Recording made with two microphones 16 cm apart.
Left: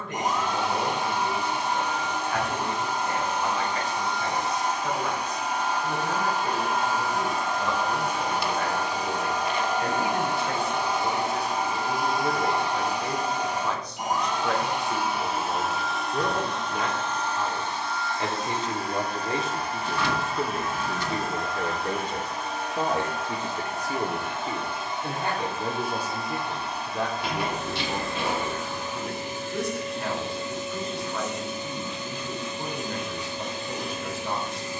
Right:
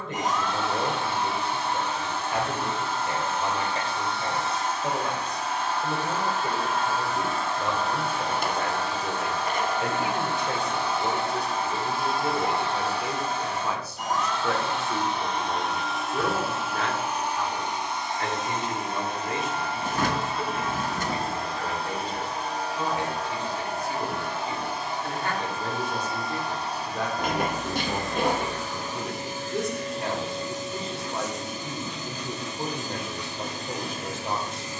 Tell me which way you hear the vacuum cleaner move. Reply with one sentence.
You can hear the vacuum cleaner go from the left side to the right.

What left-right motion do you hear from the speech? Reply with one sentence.
You can hear the speech go left and come back.